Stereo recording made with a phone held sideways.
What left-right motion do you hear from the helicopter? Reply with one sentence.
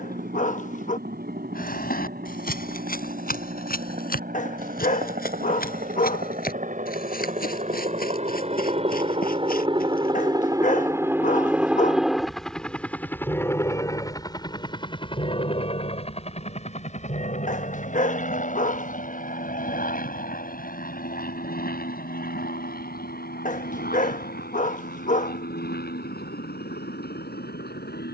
In this clip you hear the helicopter travel towards the left.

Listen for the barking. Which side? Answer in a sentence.
In this clip you hear the barking on the left.